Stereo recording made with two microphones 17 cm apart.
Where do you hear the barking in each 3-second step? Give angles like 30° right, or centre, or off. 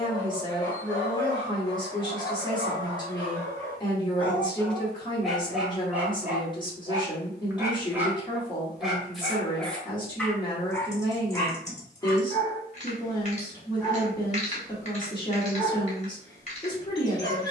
20° left, 10° left, 10° right, 10° left, 20° left, 20° left.